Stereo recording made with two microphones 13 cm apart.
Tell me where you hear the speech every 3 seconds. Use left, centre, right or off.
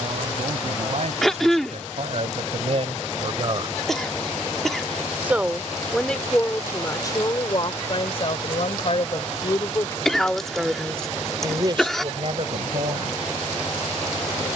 right, right, left, centre, right.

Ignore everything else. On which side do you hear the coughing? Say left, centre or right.
centre.